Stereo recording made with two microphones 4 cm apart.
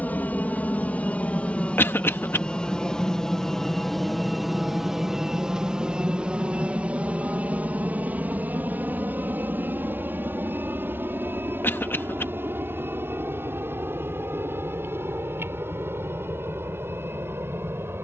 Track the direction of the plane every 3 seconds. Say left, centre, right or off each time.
left, centre, right, right, right, right.